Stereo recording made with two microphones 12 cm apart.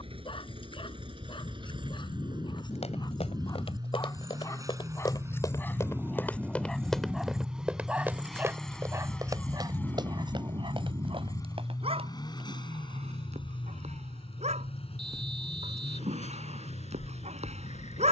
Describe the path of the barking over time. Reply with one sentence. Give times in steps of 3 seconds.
In this clip you hear the barking on the left from 0 s, in the centre from 6 s and on the right from 9 s.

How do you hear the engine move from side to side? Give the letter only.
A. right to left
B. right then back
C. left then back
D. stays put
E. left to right
A.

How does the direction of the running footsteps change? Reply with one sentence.
In this clip you hear the running footsteps travel towards the right.